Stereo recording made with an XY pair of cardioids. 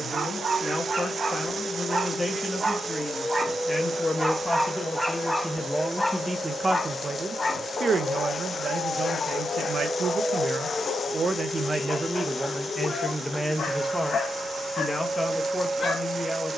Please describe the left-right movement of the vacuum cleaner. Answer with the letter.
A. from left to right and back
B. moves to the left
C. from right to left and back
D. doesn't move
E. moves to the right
D.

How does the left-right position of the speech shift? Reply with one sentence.
You can hear the speech move from left to right and back again.